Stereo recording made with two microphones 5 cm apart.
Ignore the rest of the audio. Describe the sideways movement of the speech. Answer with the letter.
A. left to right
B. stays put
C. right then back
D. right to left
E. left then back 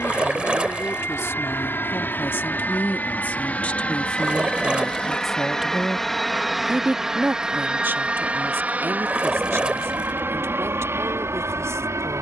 A.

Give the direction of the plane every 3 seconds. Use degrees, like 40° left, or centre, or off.
40° left, 20° left, 10° right, 40° right.